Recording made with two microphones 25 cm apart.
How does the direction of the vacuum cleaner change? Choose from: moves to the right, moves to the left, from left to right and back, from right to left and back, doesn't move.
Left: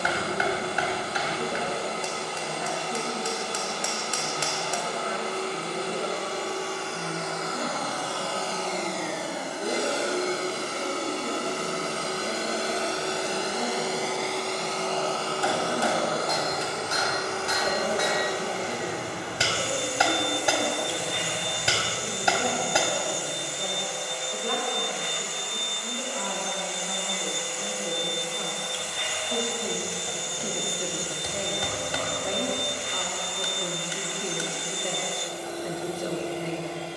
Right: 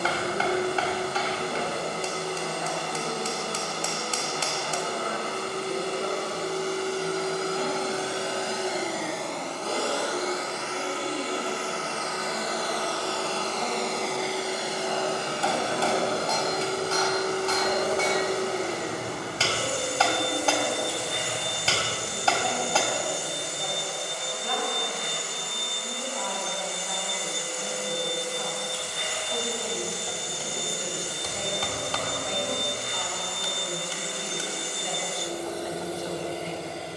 from right to left and back.